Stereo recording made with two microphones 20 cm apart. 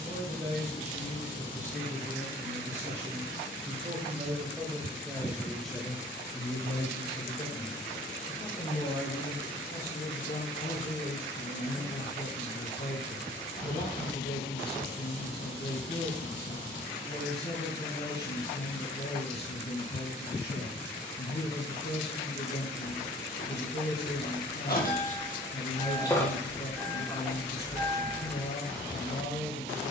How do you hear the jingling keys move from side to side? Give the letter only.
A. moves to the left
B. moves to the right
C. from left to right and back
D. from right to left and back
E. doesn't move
B.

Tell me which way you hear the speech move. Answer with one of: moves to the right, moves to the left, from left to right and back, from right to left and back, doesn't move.
moves to the left.